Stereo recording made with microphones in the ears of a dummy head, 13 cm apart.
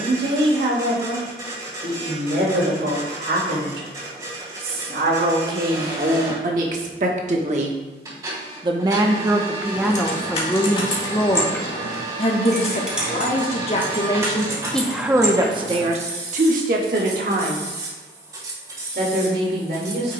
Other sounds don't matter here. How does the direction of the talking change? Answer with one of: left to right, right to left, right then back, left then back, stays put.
left then back.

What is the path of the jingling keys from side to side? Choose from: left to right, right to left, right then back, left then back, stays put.
left to right.